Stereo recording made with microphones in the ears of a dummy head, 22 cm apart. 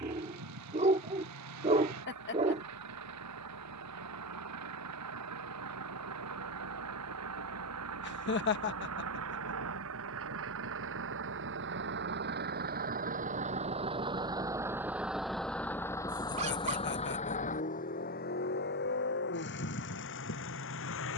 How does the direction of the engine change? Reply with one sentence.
In this clip you hear the engine travel towards the left.